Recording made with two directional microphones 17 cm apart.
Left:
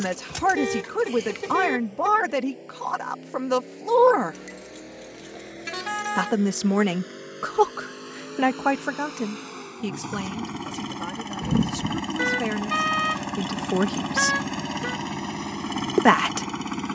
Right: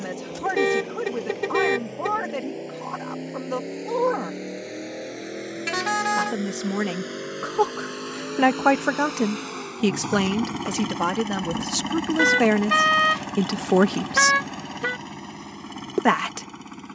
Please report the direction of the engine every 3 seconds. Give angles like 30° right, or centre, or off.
50° right, 50° right, 40° right, 20° right, 20° left, 50° left.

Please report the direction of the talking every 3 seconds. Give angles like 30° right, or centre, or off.
40° left, 40° left, 10° left, 50° right, 40° right, 20° left.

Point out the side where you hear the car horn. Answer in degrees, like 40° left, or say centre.
30° right.